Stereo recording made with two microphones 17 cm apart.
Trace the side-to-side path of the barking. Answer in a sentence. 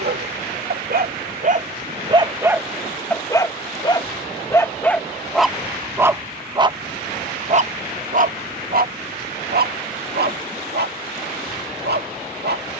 In this clip you hear the barking move from right to left and back again.